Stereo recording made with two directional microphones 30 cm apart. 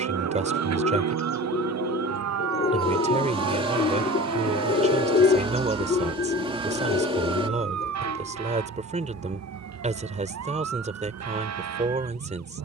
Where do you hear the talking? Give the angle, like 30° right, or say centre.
20° right.